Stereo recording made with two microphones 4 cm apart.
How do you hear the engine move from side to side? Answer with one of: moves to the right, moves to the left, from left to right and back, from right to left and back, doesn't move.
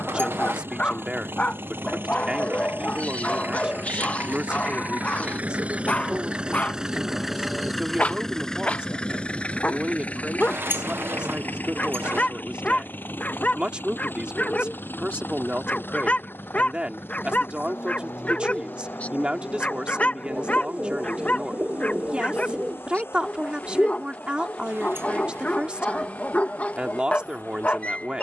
moves to the left.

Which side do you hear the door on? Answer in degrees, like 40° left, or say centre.
80° right.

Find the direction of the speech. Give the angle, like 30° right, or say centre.
30° right.